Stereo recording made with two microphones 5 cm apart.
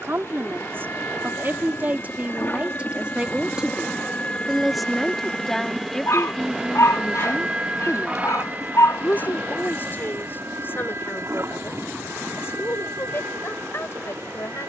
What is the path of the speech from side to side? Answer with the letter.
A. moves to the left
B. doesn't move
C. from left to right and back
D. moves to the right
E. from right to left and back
A.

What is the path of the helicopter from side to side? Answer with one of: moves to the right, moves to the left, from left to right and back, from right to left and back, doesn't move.
moves to the right.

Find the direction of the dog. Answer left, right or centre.
left.